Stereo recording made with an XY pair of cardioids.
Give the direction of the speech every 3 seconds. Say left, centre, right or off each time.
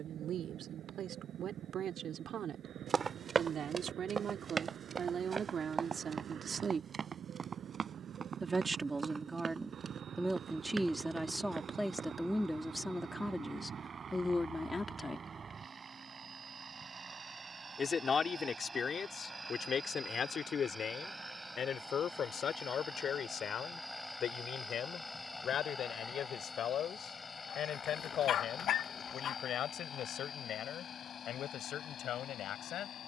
right, right, right, centre, centre, left, left, left, left, left, left.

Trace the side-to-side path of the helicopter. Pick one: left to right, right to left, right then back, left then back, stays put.
right to left.